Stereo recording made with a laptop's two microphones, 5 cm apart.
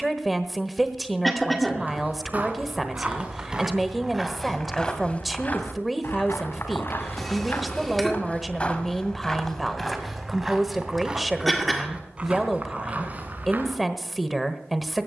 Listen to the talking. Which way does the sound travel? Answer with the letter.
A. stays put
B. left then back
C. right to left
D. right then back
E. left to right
A.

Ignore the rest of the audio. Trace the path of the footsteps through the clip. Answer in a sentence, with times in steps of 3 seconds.
In this clip you hear the footsteps on the right from 0 s, in the centre from 3 s, on the left from 6 s, in the centre from 9 s and on the right from 12 s.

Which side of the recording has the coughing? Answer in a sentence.
In this clip you hear the coughing in the centre.